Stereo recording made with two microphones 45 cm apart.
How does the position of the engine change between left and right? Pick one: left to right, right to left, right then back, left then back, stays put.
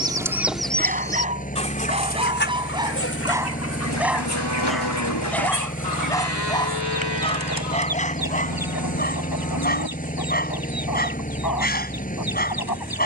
stays put.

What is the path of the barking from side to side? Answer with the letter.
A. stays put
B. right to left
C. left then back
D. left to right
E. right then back
B.